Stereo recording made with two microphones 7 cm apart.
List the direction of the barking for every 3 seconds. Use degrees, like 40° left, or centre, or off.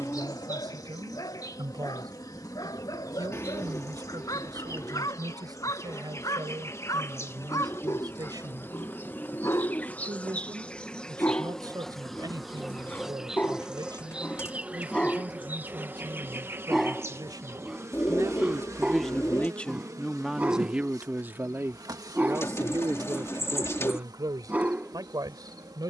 60° left, 60° left, 50° left, 30° left, 20° left, centre, 20° right, 20° right, 20° right.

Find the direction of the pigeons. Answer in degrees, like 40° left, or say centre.
40° left.